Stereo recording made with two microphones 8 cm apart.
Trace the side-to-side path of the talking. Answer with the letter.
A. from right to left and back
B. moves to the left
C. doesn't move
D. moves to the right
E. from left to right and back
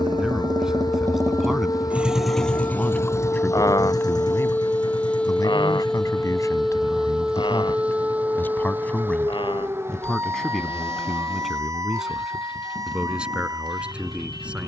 A.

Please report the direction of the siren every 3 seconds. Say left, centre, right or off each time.
left, left, centre, right, right.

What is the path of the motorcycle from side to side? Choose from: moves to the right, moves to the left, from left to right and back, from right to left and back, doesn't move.
moves to the left.